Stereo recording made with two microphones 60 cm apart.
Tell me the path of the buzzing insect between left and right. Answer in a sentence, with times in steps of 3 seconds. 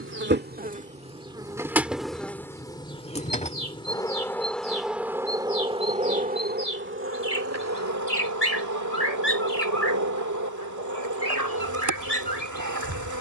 In this clip you hear the buzzing insect in the centre from 0 s and on the right from 6 s.